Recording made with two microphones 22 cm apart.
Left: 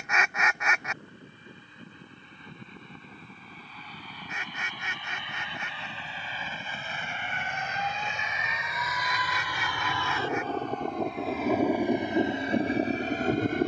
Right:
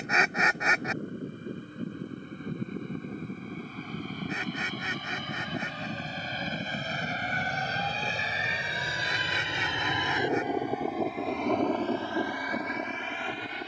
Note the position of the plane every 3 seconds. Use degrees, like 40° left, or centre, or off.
50° right, 50° right, 40° right, 10° right, 30° left.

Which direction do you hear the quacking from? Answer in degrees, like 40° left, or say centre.
30° right.